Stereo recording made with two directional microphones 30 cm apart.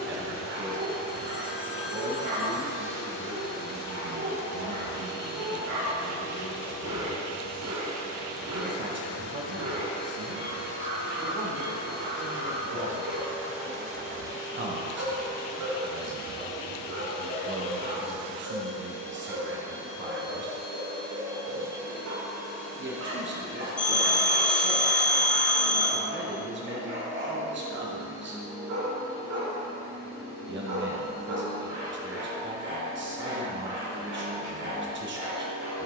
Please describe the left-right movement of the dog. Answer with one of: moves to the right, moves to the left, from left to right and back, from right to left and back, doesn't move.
doesn't move.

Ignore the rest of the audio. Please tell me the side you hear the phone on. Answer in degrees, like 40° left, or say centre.
30° left.